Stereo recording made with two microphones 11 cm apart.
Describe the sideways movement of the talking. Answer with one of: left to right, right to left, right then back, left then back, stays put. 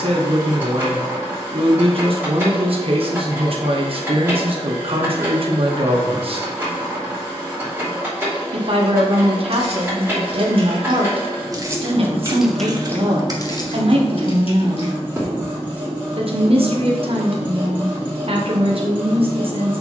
stays put.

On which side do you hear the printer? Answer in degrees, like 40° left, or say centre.
20° right.